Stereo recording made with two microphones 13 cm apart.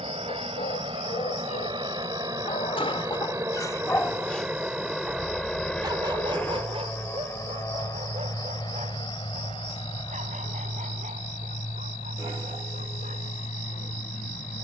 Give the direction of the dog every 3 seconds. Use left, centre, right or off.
left, centre, right, right, right.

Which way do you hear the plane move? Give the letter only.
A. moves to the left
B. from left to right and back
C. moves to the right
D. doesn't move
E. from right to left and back
A.